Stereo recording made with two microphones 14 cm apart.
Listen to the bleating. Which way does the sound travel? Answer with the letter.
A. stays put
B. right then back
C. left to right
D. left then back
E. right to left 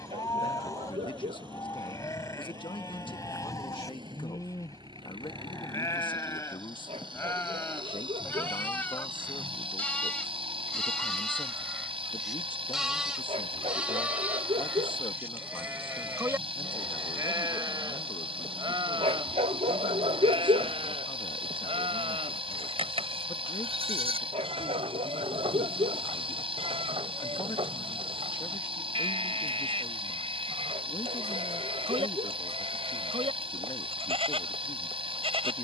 C.